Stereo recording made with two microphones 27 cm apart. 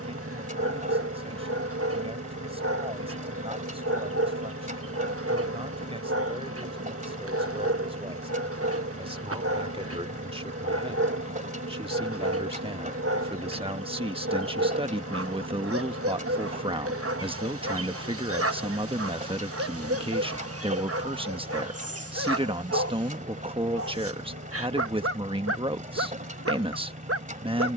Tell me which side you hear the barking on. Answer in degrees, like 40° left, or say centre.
60° right.